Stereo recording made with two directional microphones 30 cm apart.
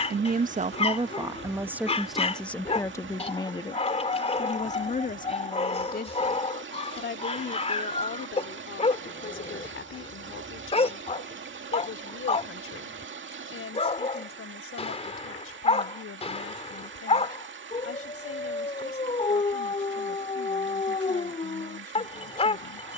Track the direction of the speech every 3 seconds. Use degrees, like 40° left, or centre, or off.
10° right, 20° left, 40° left, 40° left, 50° left, 50° left, 50° left, 50° left.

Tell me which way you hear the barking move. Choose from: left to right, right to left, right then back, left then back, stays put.
stays put.